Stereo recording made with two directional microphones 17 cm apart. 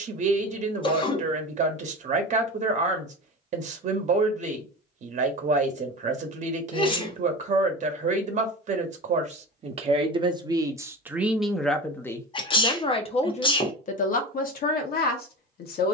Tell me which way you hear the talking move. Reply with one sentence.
In this clip you hear the talking move to the left.